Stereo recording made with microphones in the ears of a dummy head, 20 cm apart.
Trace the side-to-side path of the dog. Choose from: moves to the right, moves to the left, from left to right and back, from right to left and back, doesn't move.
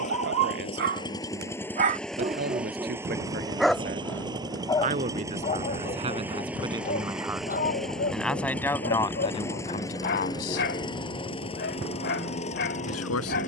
moves to the left.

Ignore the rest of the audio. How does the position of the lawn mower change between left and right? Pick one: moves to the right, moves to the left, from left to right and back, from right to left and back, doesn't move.
from left to right and back.